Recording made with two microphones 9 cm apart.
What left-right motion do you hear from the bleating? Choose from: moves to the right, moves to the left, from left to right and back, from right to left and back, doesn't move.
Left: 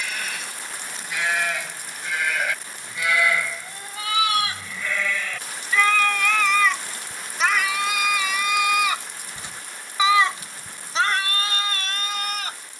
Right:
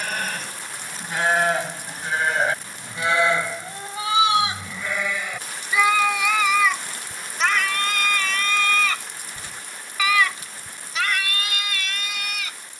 moves to the left.